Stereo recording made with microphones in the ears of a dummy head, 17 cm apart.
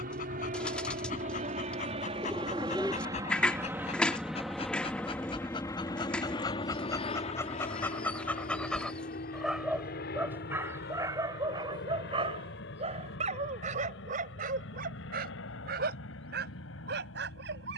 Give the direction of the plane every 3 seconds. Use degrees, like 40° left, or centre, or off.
40° right, centre, 30° left, 50° left, 60° left, 70° left.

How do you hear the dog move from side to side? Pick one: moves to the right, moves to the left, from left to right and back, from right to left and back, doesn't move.
moves to the right.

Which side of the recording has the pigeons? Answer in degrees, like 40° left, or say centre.
10° left.